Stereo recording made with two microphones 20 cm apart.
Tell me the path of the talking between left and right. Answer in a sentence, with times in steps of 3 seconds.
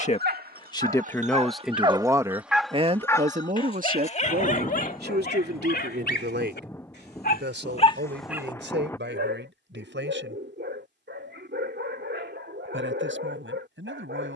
In this clip you hear the talking in the centre from 0 s and on the right from 3 s.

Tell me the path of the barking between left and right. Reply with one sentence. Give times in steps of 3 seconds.
In this clip you hear the barking on the right from 0 s, on the left from 3 s and on the right from 9 s.